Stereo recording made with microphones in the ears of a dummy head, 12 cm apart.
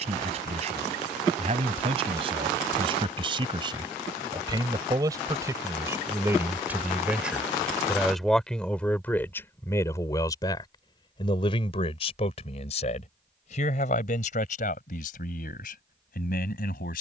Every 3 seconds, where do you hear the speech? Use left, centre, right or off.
right, right, centre, left, left, left.